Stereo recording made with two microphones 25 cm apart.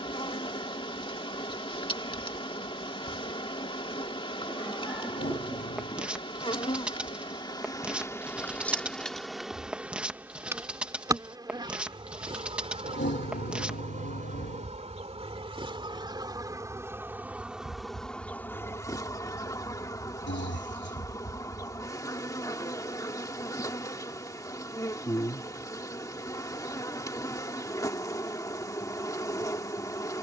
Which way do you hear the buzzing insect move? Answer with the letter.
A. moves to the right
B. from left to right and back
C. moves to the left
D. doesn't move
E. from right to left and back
B.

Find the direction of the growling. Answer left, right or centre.
left.